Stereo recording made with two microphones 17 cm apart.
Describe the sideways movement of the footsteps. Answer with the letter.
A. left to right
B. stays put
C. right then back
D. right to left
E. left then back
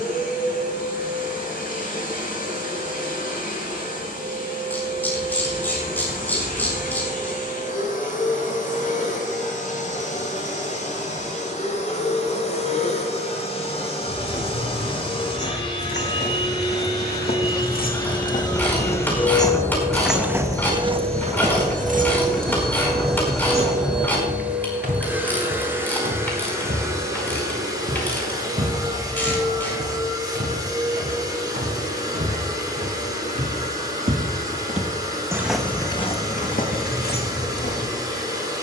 C.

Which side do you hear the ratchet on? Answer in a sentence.
In this clip you hear the ratchet in the centre.